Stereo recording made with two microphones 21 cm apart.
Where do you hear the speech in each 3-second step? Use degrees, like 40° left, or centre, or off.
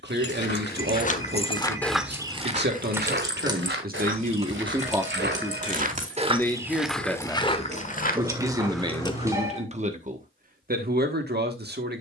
60° right, 30° right, centre, 40° right.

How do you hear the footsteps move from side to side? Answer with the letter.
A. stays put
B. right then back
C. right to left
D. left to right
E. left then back
B.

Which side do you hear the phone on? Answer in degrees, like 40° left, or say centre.
10° right.